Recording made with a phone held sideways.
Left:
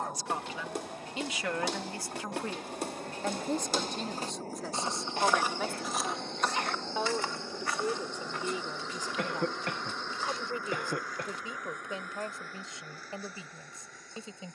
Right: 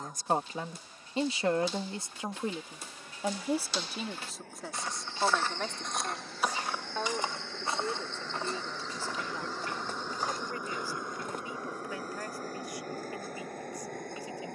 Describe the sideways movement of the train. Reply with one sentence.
You can hear the train go from the left side to the right.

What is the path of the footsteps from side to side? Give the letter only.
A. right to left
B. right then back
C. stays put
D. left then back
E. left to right
E.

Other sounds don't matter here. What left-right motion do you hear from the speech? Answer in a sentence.
You can hear the speech travel towards the left.